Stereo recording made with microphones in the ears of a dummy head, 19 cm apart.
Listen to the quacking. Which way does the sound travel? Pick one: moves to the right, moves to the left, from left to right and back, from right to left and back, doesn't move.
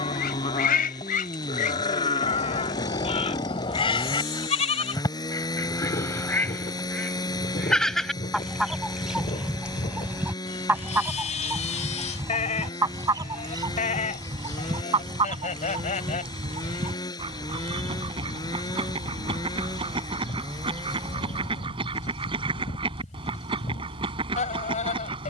moves to the right.